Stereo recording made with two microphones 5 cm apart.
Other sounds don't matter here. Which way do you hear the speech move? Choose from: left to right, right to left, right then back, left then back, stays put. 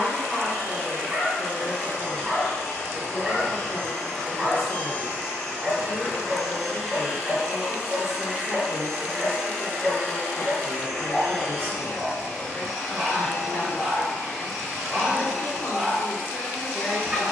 stays put.